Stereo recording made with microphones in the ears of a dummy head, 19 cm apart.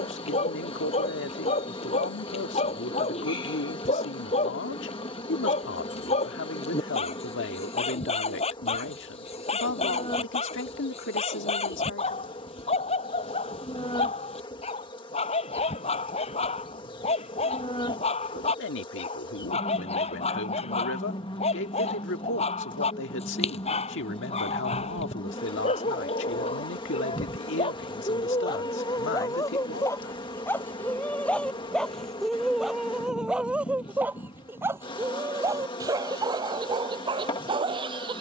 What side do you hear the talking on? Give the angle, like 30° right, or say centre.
60° left.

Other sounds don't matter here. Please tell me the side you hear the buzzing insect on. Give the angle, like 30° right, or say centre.
20° left.